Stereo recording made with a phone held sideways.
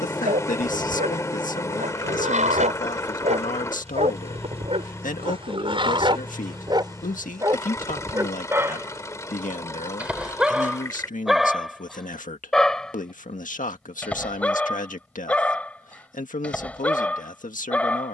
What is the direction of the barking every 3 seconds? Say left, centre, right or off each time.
right, right, right, centre, centre, centre.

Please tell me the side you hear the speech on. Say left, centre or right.
left.